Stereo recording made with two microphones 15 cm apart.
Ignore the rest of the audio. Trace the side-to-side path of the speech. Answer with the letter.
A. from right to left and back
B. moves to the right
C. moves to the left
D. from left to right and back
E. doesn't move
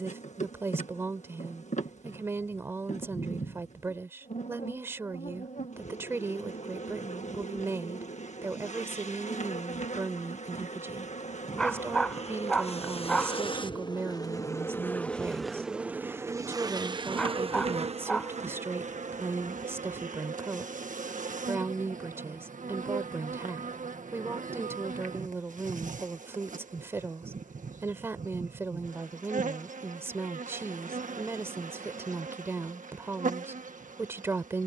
E.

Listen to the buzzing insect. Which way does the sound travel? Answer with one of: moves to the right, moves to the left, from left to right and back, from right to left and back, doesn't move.
moves to the right.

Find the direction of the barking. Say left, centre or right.
centre.